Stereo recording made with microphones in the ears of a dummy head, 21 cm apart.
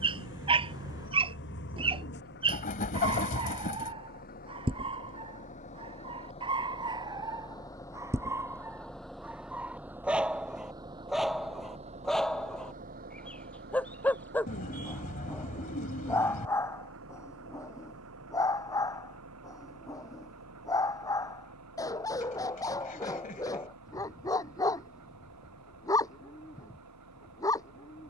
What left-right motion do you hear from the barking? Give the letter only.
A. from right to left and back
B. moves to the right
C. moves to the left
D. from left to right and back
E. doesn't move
C.